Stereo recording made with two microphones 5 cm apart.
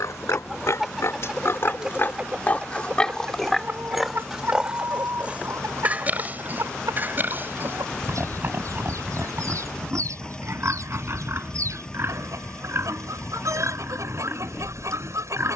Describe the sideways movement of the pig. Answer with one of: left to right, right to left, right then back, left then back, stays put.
left to right.